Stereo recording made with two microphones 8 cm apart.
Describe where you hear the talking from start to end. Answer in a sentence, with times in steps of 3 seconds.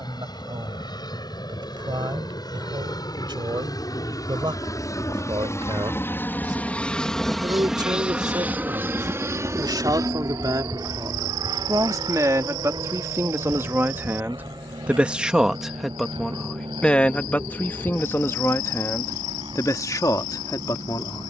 In this clip you hear the talking on the right from 0 s, in the centre from 15 s and on the left from 18 s.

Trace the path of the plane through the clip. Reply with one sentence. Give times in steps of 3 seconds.
In this clip you hear the plane on the left from 0 s, in the centre from 6 s and on the right from 9 s.